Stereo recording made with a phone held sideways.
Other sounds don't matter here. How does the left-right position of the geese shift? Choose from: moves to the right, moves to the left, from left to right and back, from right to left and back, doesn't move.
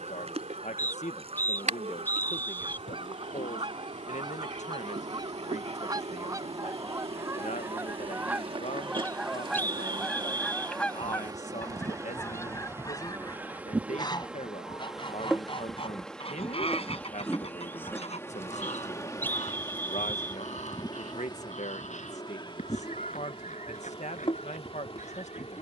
moves to the left.